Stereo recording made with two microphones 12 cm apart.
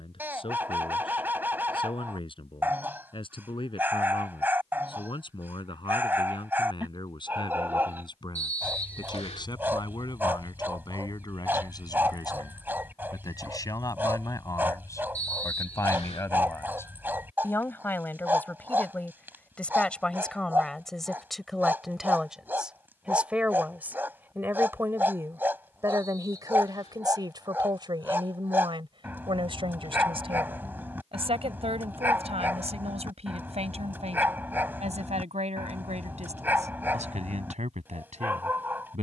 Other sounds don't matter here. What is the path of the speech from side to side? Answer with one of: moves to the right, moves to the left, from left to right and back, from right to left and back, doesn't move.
moves to the right.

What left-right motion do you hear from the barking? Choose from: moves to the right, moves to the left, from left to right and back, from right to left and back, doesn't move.
doesn't move.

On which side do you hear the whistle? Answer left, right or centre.
left.